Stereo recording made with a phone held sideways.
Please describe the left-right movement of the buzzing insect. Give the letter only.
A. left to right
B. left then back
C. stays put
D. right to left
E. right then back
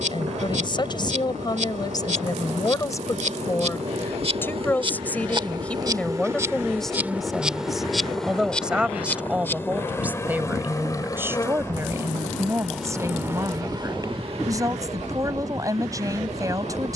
B.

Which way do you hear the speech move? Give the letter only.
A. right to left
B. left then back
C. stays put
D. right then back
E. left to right
E.